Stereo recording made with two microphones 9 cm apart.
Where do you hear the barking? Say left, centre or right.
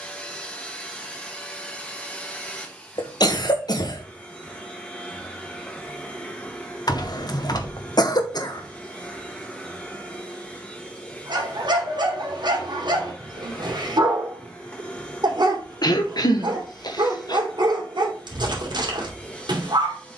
right.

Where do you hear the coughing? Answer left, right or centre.
left.